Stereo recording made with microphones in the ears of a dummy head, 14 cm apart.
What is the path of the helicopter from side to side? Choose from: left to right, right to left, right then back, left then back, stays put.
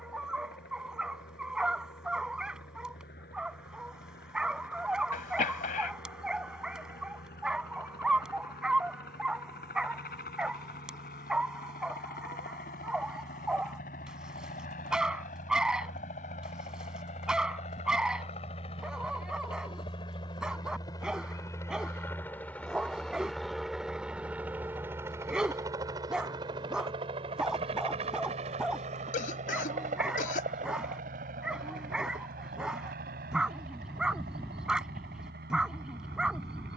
left to right.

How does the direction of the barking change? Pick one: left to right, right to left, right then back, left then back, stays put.
stays put.